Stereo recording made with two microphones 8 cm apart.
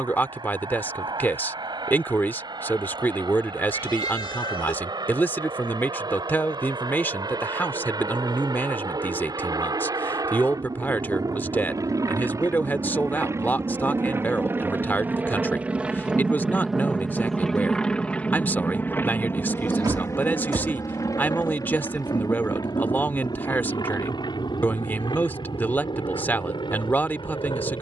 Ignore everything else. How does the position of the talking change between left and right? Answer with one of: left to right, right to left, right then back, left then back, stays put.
stays put.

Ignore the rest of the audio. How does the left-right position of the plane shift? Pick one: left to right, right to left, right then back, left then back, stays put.
right to left.